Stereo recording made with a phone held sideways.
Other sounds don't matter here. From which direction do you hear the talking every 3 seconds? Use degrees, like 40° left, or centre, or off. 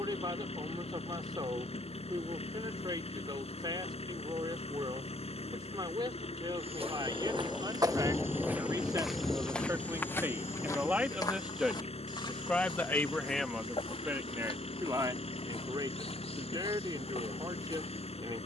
40° right, 40° right, 30° right, 10° right, centre, 30° right.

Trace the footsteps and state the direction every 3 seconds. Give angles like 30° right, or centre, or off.
off, off, 30° right, 20° left, 40° left, 50° left.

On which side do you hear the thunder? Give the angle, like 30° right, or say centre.
centre.